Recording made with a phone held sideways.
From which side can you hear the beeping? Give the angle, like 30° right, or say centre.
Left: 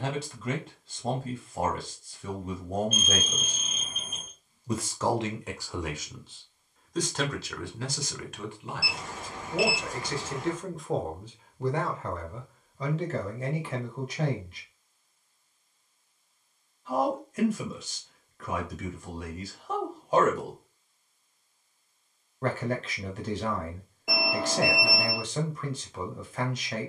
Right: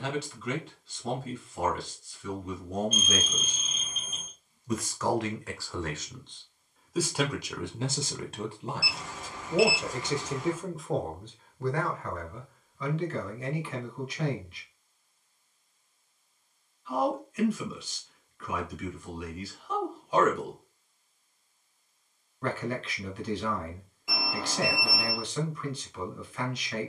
60° left.